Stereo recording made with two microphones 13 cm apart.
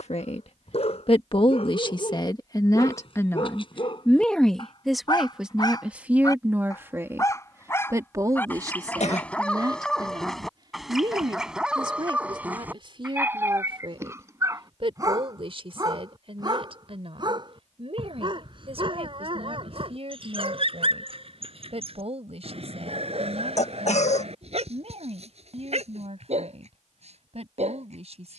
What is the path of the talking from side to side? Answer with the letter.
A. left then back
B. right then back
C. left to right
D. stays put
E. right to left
C.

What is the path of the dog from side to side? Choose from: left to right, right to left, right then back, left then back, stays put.
left to right.